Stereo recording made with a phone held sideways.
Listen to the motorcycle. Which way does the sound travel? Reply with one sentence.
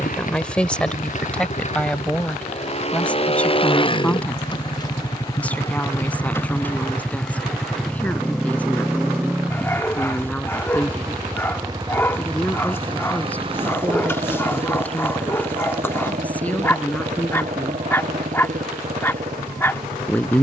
You can hear the motorcycle go from the left side to the right.